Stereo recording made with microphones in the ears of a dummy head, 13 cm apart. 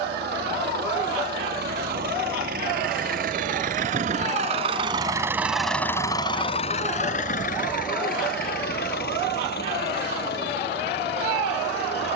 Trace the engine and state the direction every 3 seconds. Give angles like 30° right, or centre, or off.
70° right, 40° right, 60° left, 80° left.